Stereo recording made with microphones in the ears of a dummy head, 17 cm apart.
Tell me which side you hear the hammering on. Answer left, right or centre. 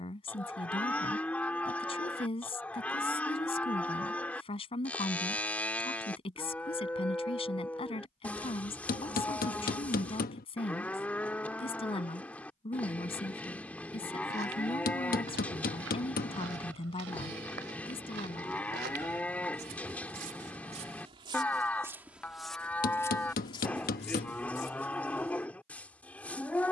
left.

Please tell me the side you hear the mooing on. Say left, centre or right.
centre.